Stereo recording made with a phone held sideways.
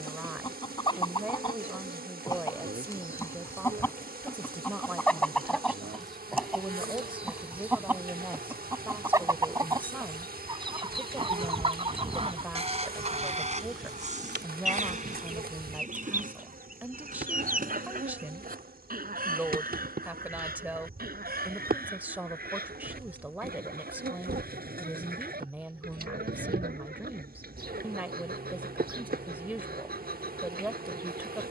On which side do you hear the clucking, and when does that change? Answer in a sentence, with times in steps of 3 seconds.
In this clip you hear the clucking on the left from 0 s, in the centre from 3 s and on the right from 9 s.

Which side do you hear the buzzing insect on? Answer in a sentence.
In this clip you hear the buzzing insect on the right.